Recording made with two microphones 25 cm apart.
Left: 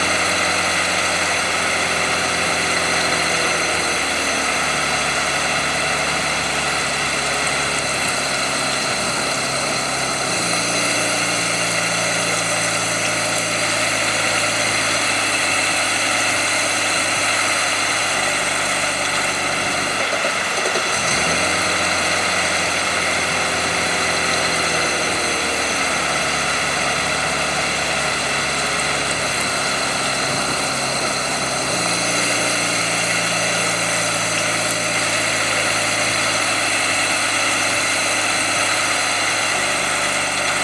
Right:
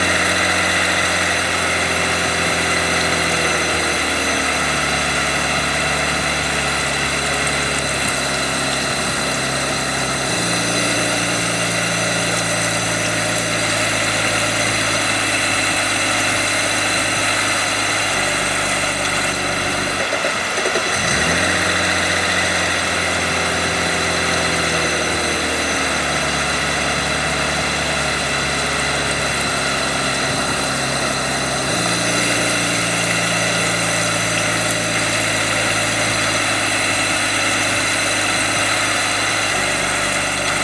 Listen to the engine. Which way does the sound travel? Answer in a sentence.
You can hear the engine stay put.